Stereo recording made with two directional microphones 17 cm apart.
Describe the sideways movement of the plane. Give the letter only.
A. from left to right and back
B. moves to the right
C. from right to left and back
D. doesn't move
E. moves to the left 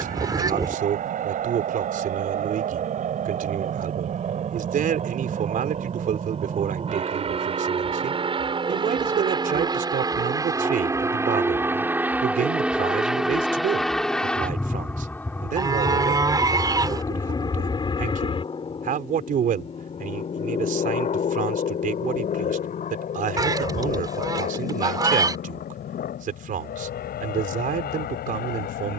E.